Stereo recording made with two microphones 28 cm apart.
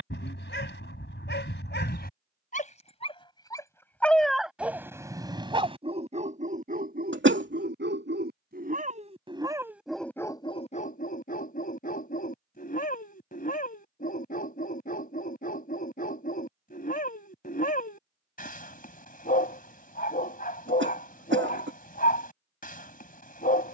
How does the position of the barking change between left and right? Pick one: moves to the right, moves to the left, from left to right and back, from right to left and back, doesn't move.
from left to right and back.